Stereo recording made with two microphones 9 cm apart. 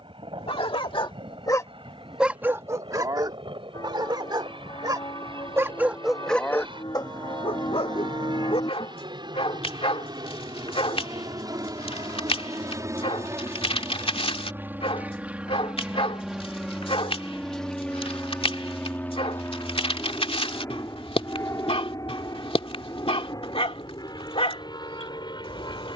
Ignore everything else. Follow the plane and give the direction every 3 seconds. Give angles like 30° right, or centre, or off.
70° right, 70° right, 60° right, 50° right, 30° right, centre, 20° left, 40° left, 50° left.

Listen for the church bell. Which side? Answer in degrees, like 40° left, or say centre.
50° left.